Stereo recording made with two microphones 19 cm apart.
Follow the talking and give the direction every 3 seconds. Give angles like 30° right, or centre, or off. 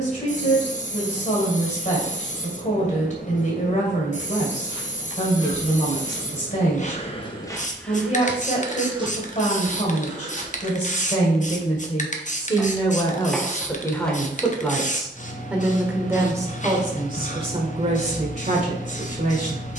40° left, 40° left, 40° left, 40° left, 20° left, 20° right, 40° right.